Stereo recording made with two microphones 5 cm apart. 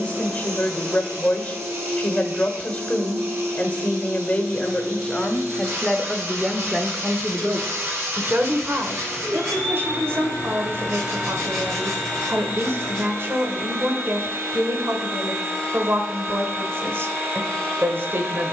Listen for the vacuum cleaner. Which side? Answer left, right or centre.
right.